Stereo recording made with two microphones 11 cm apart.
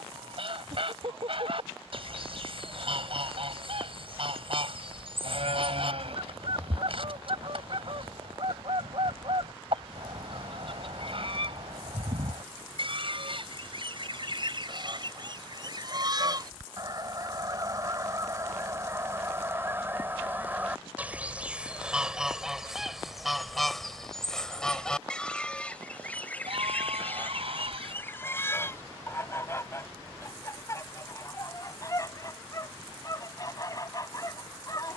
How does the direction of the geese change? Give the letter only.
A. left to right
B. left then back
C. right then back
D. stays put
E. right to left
E.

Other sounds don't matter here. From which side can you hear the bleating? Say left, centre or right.
right.